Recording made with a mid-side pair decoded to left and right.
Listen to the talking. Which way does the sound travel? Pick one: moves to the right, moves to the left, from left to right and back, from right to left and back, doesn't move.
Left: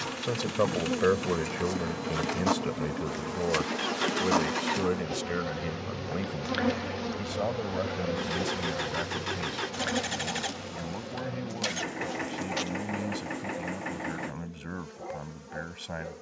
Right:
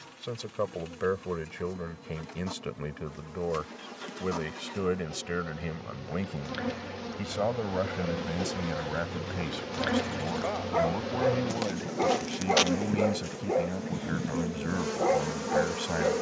moves to the right.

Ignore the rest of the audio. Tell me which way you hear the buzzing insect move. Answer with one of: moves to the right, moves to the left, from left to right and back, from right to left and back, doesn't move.
moves to the right.